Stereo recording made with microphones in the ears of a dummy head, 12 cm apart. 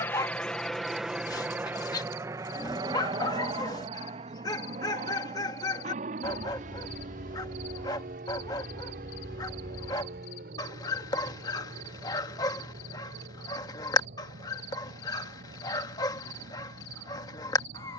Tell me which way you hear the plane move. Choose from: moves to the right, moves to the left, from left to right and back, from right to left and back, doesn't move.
moves to the right.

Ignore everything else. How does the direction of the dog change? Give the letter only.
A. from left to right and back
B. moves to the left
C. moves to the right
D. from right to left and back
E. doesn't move
E.